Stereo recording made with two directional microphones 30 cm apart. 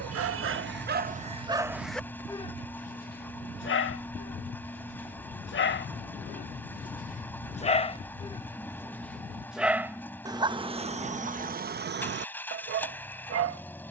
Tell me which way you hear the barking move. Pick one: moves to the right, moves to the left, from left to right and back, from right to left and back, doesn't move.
from right to left and back.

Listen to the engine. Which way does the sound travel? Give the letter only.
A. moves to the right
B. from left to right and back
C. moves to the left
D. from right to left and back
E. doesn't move
E.